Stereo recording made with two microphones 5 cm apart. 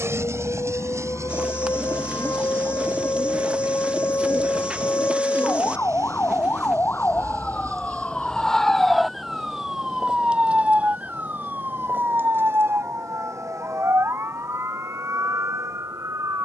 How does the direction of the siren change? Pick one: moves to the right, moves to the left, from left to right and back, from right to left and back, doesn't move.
moves to the right.